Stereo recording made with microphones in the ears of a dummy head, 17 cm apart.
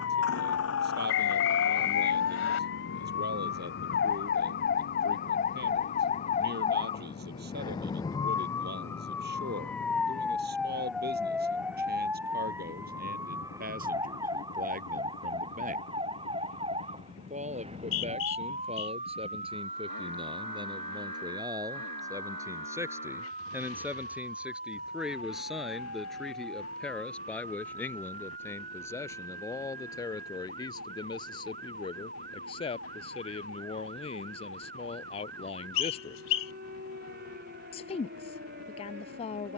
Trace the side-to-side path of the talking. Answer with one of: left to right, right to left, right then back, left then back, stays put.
right to left.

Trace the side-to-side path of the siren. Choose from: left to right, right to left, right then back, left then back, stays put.
left to right.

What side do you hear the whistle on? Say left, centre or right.
left.